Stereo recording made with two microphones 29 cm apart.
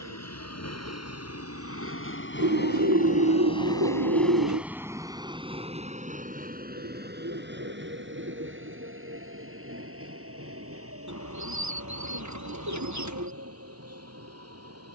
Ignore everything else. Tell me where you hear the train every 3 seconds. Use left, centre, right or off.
left, centre, right, right, right.